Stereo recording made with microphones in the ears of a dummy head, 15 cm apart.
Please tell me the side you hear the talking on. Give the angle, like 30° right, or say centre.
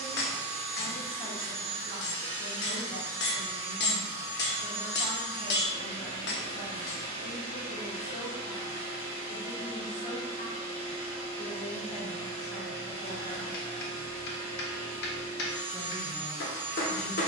40° left.